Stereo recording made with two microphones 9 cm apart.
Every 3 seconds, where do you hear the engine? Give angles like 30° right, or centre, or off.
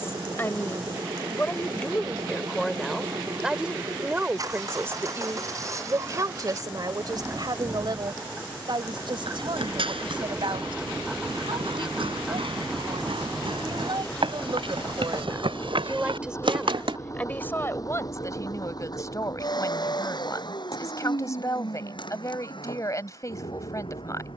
50° right, 40° right, 30° right, 10° right, 10° left, 30° left, 50° left, 60° left.